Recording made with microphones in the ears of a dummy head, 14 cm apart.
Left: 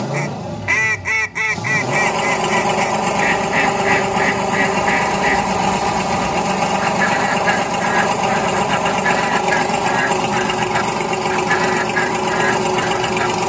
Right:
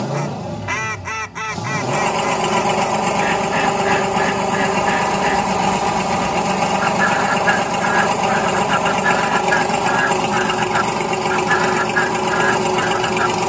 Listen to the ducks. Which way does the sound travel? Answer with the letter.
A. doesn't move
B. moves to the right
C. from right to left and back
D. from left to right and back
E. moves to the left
A.